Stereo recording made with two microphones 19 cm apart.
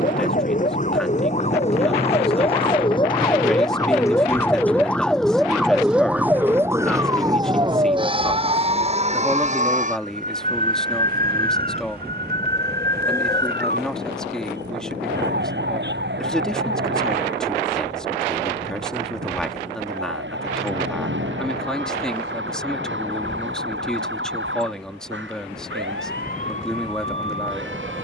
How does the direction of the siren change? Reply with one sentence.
In this clip you hear the siren travel towards the right.